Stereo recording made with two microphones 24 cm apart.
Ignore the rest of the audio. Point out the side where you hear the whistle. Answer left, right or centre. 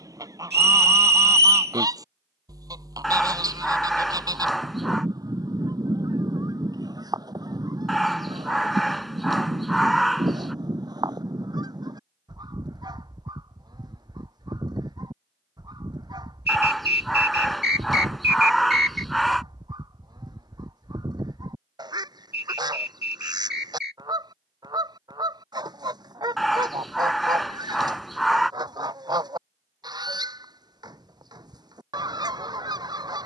right.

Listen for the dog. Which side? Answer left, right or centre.
centre.